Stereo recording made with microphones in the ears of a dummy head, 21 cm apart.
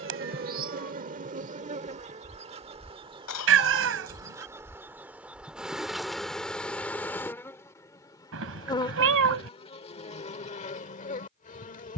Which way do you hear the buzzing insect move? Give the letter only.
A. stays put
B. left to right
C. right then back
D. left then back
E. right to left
E.